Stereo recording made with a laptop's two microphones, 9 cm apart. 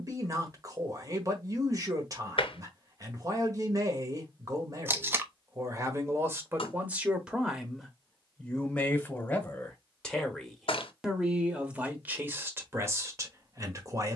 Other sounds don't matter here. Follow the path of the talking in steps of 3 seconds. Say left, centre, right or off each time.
right, right, centre, centre, right.